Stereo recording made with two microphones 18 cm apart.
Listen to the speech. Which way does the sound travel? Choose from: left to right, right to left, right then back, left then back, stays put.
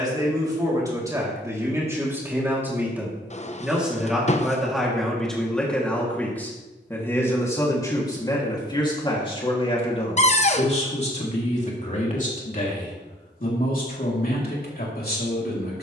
right to left.